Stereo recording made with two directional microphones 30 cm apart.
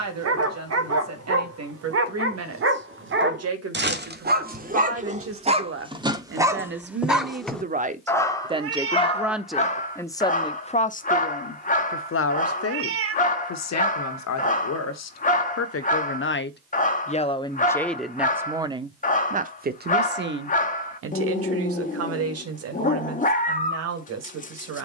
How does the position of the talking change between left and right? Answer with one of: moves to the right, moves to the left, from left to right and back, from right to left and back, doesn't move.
from right to left and back.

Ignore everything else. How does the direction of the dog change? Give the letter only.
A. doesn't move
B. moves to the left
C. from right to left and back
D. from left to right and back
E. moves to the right
B.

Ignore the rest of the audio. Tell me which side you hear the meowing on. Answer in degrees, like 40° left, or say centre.
50° right.